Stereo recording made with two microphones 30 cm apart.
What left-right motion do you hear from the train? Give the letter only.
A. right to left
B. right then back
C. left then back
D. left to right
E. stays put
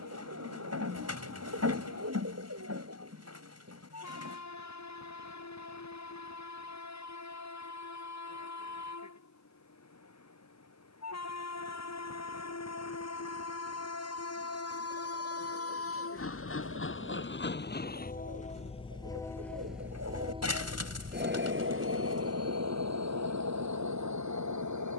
D.